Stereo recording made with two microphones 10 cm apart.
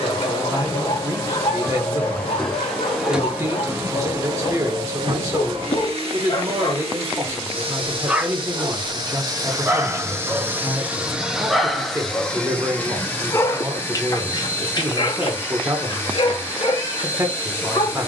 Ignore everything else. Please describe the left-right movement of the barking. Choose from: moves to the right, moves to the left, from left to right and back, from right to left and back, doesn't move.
from left to right and back.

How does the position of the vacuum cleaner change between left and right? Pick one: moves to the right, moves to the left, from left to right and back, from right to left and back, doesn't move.
from left to right and back.